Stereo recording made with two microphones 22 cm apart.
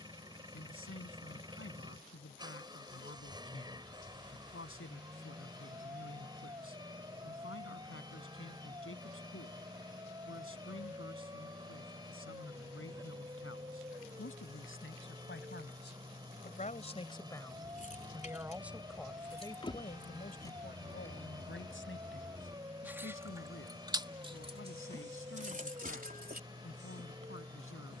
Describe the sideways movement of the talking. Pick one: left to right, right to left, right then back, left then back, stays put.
right then back.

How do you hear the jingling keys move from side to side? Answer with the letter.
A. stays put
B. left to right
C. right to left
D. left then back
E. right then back
B.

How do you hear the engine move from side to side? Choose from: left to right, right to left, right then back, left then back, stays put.
stays put.